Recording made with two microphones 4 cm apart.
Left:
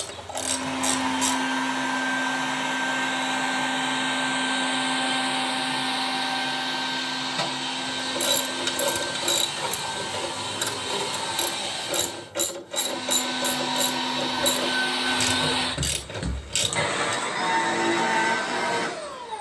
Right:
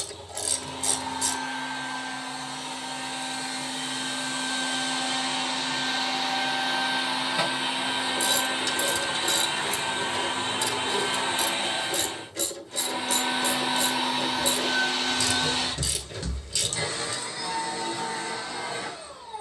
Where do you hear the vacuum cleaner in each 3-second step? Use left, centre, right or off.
left, left, centre, right, centre, left, left.